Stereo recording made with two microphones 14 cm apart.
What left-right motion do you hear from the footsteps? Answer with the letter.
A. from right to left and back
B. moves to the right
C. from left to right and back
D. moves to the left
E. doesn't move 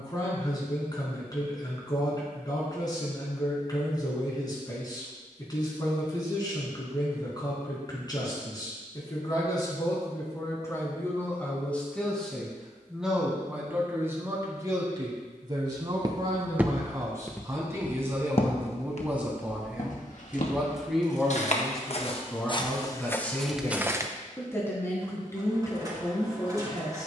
A.